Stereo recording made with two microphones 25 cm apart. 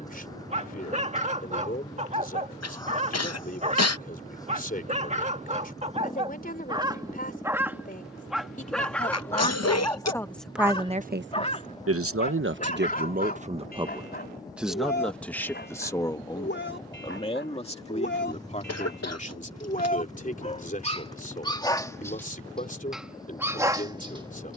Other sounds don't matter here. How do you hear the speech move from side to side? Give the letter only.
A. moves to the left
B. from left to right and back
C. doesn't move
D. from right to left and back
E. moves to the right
B.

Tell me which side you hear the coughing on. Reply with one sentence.
You can hear the coughing on the left.